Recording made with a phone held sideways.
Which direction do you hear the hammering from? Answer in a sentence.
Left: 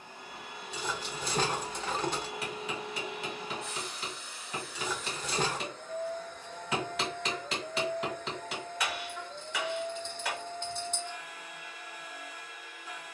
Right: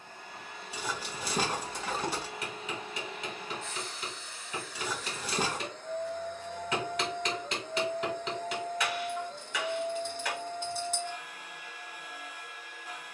You can hear the hammering in the centre.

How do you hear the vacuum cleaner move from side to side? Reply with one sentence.
You can hear the vacuum cleaner travel towards the right.